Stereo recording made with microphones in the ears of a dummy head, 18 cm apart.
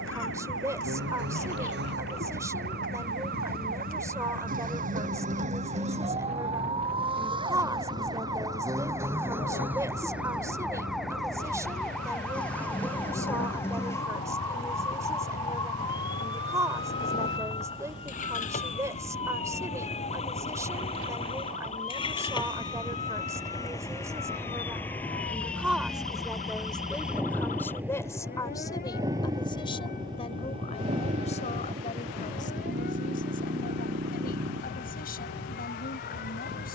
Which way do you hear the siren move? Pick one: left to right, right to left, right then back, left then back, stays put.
right to left.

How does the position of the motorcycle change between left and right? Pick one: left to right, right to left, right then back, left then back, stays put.
left to right.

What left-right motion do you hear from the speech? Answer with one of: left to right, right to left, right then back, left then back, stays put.
right to left.